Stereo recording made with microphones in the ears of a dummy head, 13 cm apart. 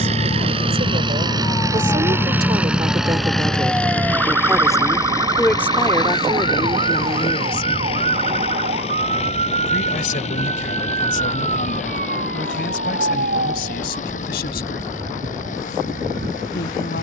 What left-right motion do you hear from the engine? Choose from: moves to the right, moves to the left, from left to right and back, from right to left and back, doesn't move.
moves to the left.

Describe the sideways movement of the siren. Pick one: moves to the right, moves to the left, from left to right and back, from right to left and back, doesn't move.
moves to the right.